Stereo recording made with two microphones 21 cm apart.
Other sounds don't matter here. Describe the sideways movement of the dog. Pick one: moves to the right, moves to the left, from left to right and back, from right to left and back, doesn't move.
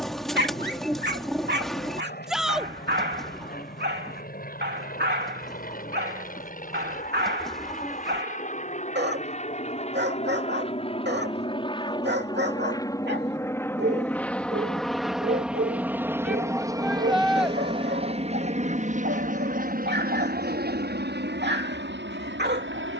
doesn't move.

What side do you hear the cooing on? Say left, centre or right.
centre.